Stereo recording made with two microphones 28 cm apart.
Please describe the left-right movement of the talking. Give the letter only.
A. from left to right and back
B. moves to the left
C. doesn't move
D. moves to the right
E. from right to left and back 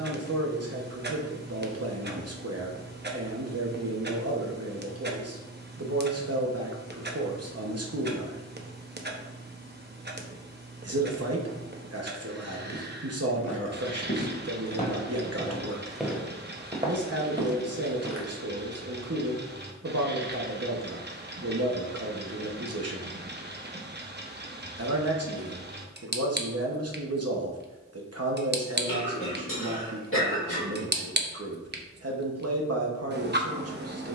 C.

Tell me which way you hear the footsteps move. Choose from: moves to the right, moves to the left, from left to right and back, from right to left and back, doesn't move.
moves to the right.